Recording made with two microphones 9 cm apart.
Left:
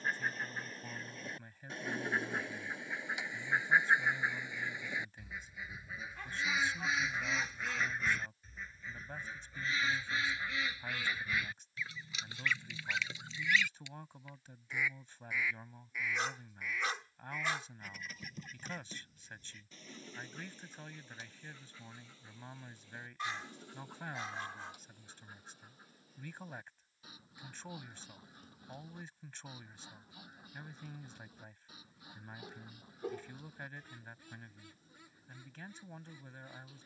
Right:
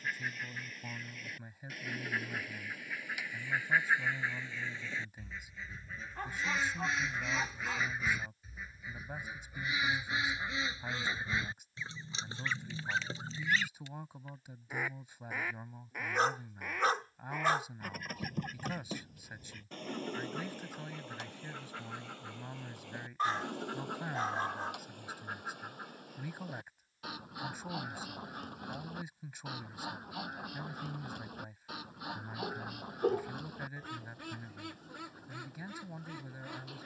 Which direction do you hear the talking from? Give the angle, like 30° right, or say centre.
10° right.